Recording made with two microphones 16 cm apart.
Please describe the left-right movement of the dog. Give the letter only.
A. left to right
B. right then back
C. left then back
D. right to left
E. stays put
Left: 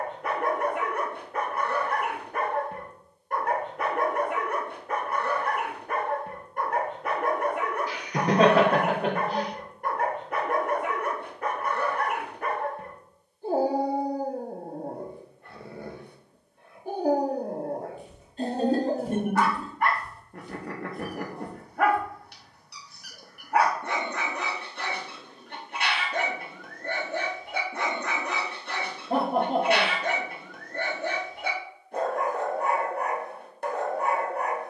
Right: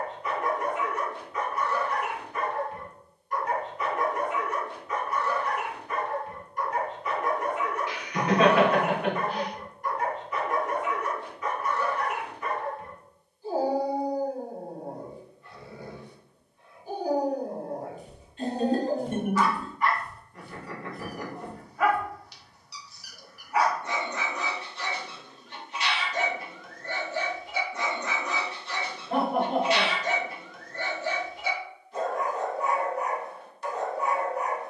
E.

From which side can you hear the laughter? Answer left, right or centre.
left.